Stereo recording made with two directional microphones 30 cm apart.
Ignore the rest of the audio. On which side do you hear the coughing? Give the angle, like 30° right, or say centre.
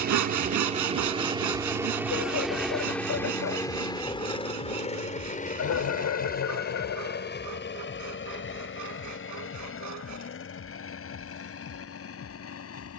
60° left.